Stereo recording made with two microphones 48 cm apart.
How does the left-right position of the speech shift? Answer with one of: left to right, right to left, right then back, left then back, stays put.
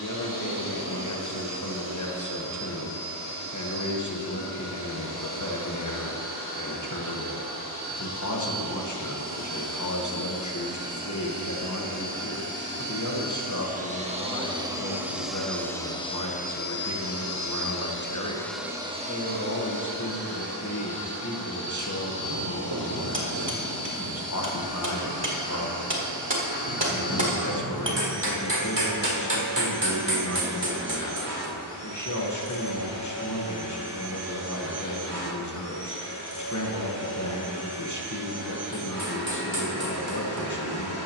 stays put.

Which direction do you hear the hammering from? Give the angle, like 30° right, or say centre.
60° right.